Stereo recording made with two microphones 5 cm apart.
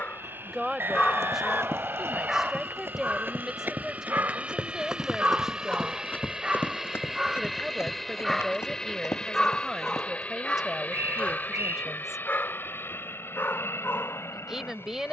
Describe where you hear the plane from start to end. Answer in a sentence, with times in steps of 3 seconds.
In this clip you hear the plane on the right from 0 s, in the centre from 6 s and on the left from 9 s.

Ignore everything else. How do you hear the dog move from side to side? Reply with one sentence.
You can hear the dog move from left to right and back again.